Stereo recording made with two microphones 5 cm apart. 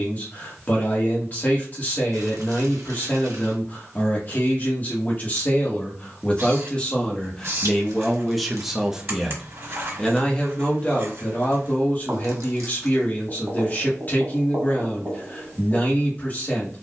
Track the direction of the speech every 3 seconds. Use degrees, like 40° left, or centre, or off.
30° left, 30° left, 10° left, 20° left, 30° left, 30° left.